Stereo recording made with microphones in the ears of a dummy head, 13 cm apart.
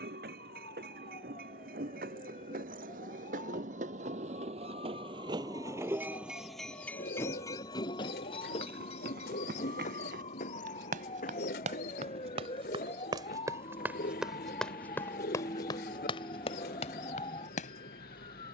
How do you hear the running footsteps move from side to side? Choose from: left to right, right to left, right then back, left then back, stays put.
right to left.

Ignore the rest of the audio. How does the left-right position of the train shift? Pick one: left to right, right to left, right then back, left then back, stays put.
right to left.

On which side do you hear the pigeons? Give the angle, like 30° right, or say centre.
70° left.